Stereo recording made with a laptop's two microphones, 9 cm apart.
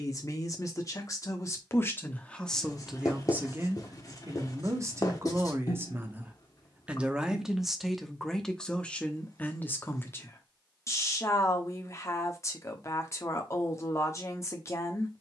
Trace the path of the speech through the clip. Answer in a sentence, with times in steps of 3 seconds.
In this clip you hear the speech on the left from 0 s, on the right from 3 s, in the centre from 6 s and on the left from 9 s.